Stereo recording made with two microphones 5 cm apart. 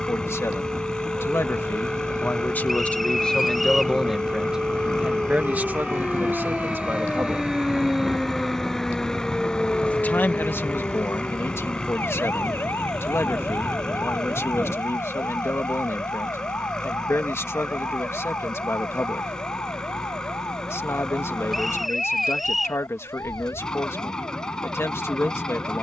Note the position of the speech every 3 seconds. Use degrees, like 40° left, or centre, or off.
50° left, 10° right, 40° right, 50° left, 60° left, 60° left, 60° left, 60° left, 60° left.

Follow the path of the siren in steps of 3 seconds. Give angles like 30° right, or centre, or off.
60° right, 40° right, 20° right, 30° left, 60° left, 70° left, 70° left, 80° left, 80° left.